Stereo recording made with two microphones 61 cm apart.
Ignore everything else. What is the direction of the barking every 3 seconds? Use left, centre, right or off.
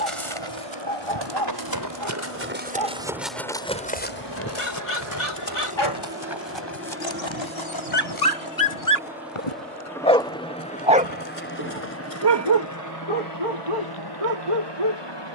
left, left, left, centre, right.